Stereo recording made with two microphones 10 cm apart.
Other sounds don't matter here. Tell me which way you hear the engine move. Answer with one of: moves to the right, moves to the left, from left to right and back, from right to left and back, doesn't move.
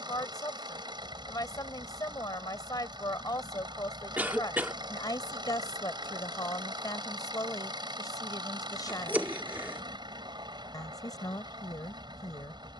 doesn't move.